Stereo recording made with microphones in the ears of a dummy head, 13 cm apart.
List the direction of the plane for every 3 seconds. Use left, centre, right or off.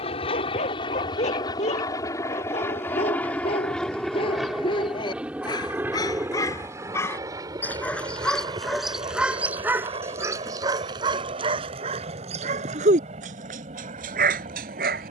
left, centre, right, right, right.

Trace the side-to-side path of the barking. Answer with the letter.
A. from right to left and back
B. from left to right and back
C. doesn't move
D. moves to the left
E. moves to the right
E.